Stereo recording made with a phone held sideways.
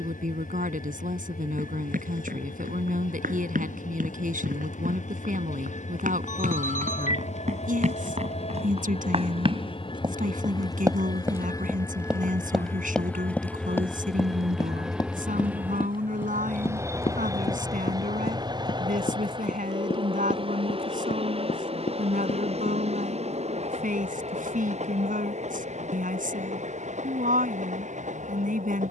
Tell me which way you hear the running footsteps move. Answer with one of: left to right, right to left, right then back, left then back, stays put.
right to left.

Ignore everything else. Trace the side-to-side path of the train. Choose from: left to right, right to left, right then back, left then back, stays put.
left to right.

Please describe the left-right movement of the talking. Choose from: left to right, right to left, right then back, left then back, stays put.
stays put.